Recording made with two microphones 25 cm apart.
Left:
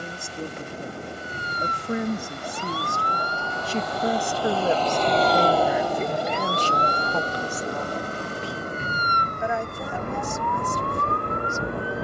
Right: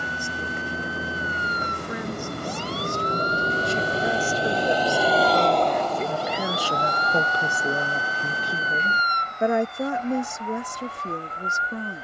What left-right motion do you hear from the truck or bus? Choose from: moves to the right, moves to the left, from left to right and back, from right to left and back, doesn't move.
moves to the left.